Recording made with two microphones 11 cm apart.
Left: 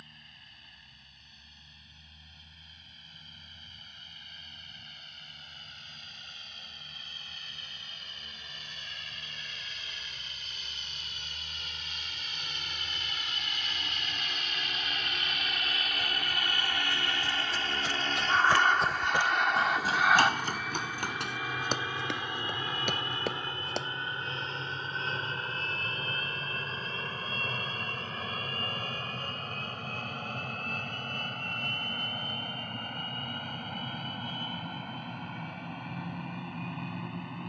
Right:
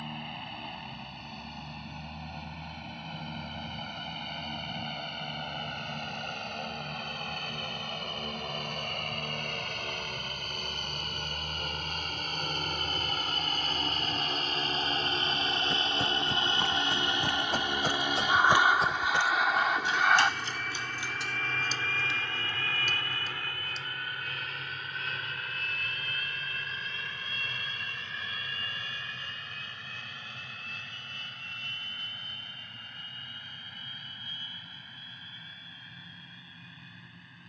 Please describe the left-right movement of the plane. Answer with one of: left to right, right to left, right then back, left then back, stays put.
right to left.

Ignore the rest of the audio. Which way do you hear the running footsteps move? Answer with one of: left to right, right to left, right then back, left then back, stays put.
right to left.